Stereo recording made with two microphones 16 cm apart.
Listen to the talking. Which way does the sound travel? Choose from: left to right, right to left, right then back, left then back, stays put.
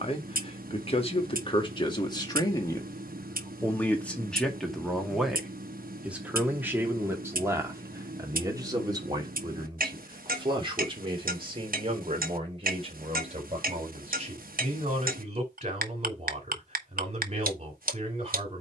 left to right.